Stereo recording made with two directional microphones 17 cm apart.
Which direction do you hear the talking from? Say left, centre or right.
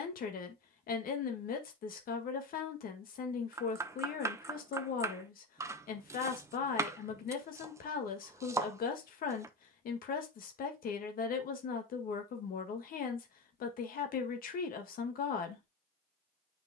left.